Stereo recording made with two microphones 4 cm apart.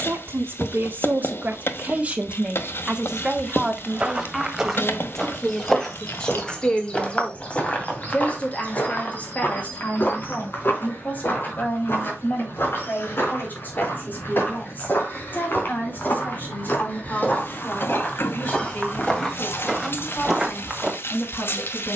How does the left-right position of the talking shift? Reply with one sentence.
You can hear the talking move from right to left.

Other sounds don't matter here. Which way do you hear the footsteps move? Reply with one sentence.
You can hear the footsteps go left and come back.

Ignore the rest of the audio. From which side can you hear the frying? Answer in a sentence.
In this clip you hear the frying on the left.